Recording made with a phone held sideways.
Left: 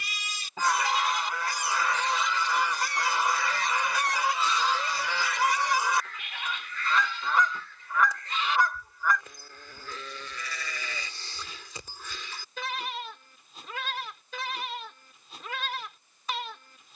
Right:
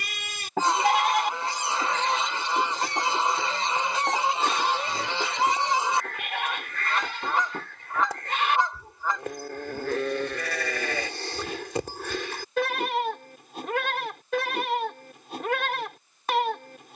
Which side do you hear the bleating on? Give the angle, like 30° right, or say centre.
70° right.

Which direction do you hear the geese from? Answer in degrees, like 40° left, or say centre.
30° right.